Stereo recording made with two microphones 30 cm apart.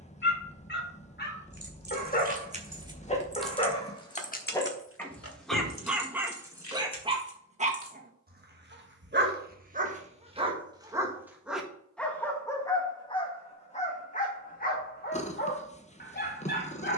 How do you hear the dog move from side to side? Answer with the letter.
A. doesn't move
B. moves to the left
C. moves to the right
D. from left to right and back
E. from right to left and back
D.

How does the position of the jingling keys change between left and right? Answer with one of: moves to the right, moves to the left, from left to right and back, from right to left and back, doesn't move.
moves to the left.